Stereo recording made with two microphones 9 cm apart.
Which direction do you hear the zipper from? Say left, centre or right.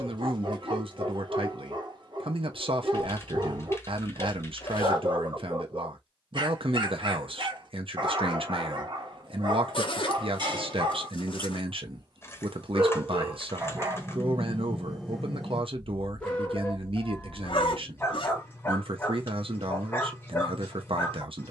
left.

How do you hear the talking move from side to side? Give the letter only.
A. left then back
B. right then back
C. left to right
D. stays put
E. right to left
D.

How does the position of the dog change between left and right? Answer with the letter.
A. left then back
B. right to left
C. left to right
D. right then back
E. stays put
B.